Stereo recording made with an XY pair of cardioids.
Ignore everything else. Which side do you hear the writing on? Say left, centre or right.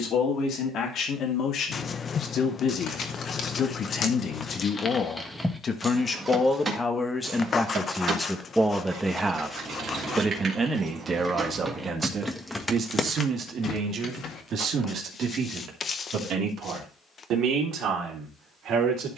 left.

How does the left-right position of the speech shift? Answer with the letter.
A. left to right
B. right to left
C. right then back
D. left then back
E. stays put
A.